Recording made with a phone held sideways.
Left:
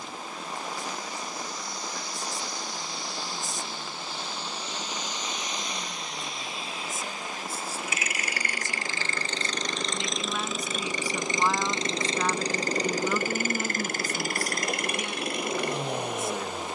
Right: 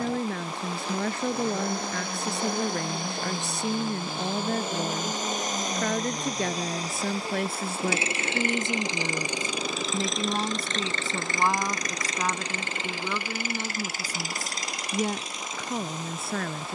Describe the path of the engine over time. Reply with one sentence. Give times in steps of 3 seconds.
In this clip you hear the engine on the right from 0 s, in the centre from 9 s and on the left from 12 s.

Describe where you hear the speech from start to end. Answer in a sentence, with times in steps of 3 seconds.
You can hear the speech on the right from 0 s, in the centre from 12 s and on the right from 15 s.